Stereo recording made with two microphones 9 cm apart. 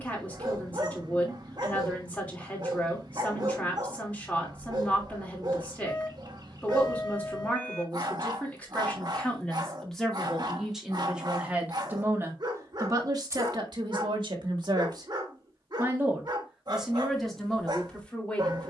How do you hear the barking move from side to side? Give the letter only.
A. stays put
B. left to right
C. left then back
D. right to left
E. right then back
A.